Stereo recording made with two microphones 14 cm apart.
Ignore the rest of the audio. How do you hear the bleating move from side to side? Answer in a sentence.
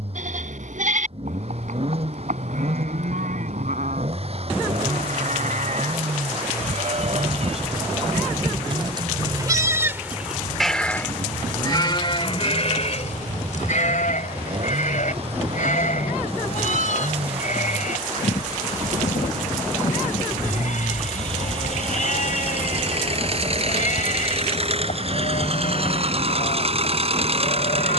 You can hear the bleating travel towards the left.